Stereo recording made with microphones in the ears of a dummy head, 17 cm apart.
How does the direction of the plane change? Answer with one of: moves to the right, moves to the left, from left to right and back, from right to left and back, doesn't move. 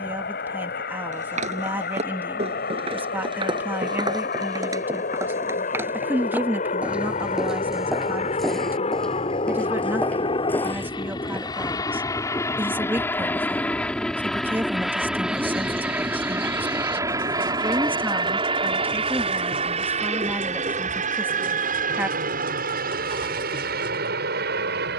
moves to the right.